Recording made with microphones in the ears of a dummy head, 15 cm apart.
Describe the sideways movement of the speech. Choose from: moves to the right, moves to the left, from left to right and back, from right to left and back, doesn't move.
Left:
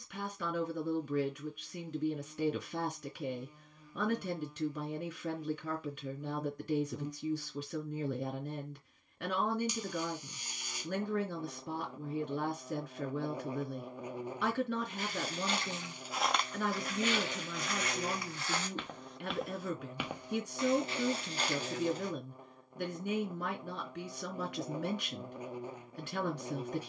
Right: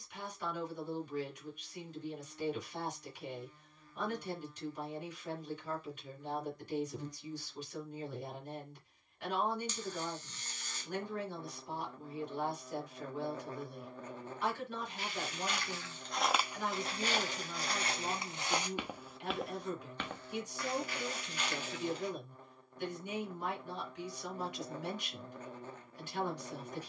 doesn't move.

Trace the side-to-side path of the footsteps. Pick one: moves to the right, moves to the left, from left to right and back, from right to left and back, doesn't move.
from left to right and back.